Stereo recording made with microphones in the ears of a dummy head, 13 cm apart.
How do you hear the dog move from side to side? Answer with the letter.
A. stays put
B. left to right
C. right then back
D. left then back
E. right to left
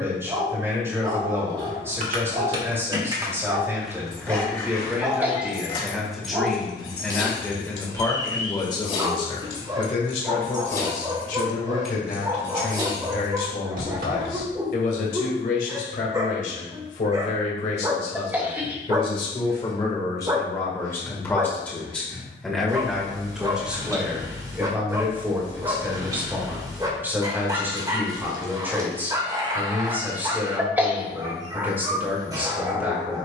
A.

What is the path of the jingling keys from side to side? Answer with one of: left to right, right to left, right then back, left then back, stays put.
left then back.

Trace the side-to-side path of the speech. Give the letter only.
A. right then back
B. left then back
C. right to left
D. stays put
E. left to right
B.